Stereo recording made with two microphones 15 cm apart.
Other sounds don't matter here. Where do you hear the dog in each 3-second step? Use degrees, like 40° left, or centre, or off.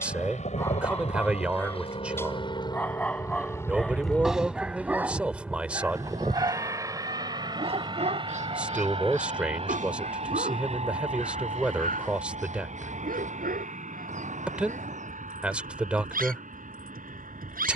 20° left, 10° right, 40° right, 70° right, 80° right, 80° right.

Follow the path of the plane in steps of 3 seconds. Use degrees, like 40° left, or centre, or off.
50° left, 10° left, 30° right, 40° right, 50° right, 60° right.